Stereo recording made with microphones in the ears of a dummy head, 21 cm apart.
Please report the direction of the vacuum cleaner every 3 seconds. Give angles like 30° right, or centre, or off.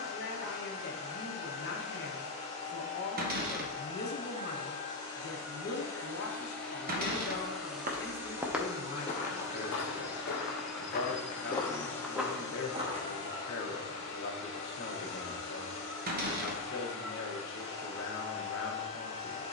30° left, 20° left, centre, centre, 20° left, 30° left, 30° left.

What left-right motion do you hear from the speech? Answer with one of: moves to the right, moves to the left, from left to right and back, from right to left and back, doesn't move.
doesn't move.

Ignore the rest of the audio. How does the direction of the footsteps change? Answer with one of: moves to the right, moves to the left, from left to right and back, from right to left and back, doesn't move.
from right to left and back.